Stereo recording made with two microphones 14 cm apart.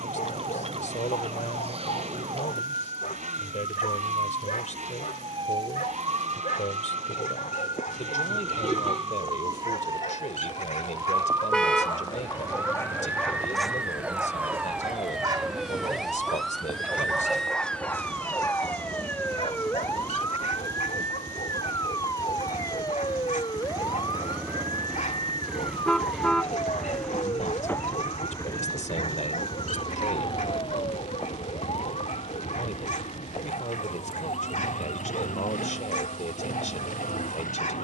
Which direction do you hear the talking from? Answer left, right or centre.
left.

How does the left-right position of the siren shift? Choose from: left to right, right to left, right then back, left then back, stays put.
right to left.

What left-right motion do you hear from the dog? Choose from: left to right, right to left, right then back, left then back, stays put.
right then back.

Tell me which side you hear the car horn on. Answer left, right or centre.
centre.